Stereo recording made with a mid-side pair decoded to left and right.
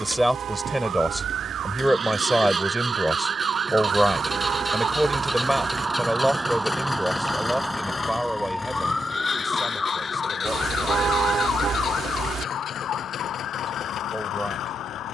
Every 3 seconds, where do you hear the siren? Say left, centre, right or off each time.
right, right, centre, left, left.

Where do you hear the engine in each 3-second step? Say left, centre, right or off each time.
right, centre, left, left, left.